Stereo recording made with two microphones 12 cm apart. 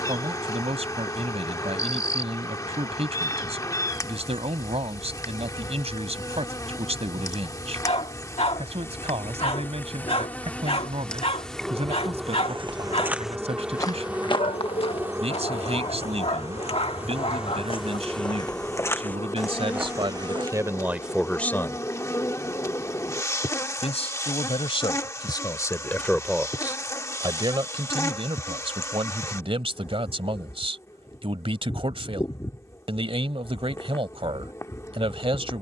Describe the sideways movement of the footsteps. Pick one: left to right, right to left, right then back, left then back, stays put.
left then back.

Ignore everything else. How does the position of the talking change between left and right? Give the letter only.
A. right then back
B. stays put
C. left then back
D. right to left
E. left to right
C.